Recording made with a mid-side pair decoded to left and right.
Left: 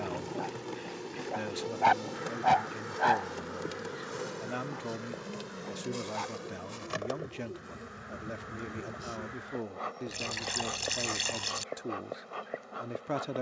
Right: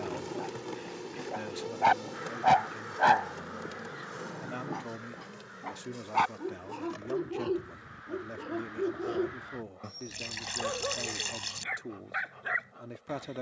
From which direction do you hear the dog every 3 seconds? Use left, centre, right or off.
centre, right, right, right, right.